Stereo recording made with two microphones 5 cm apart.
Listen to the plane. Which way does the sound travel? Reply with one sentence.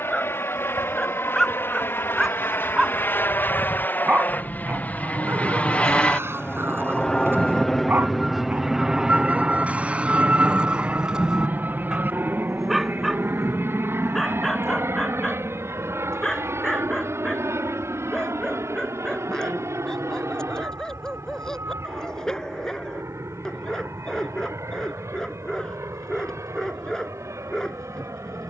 In this clip you hear the plane travel towards the right.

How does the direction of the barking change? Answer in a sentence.
You can hear the barking move from left to right and back again.